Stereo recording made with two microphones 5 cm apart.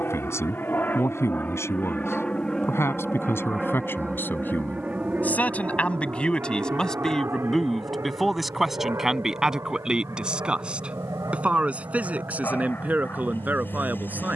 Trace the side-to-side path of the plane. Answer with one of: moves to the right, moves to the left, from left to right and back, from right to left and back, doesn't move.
moves to the right.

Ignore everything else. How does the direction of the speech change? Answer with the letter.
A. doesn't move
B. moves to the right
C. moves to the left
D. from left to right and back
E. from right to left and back
B.